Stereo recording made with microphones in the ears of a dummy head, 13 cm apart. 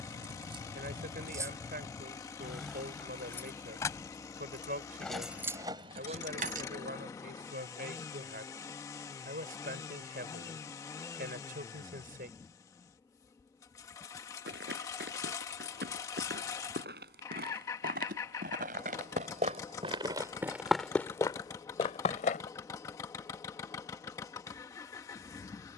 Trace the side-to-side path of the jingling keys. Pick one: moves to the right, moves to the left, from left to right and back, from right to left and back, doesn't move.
from right to left and back.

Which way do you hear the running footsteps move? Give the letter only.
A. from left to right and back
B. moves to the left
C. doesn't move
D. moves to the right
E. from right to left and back
B.